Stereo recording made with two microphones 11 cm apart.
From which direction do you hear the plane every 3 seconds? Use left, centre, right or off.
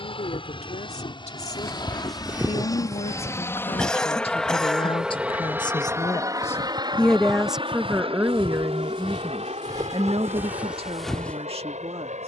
left, centre, right, right.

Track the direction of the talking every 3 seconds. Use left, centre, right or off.
left, left, centre, right.